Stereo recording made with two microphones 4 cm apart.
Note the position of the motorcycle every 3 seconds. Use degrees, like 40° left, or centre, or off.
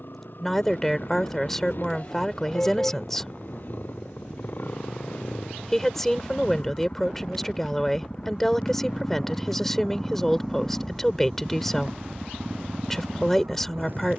50° left, 50° left, 30° left, centre, 40° right.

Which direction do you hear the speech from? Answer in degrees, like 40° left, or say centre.
10° left.